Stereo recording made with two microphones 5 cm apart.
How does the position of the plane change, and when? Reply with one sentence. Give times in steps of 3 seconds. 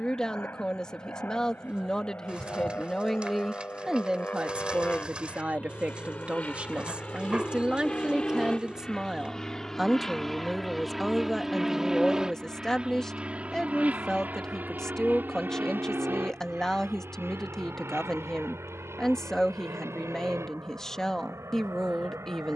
You can hear the plane on the left from 0 s, in the centre from 9 s and on the right from 12 s.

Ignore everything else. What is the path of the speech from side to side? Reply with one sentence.
In this clip you hear the speech move from left to right and back again.